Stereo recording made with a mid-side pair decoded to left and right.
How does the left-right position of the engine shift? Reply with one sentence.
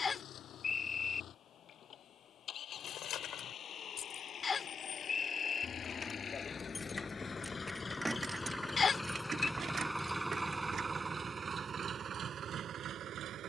You can hear the engine go from the left side to the right.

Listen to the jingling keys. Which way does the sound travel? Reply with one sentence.
In this clip you hear the jingling keys travel towards the right.